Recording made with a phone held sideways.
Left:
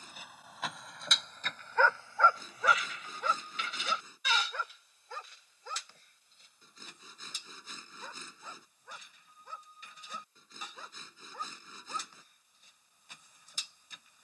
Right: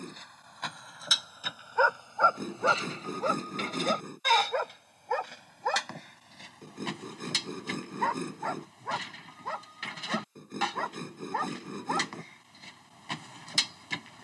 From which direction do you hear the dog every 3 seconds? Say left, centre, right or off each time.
centre, right, right, right, right.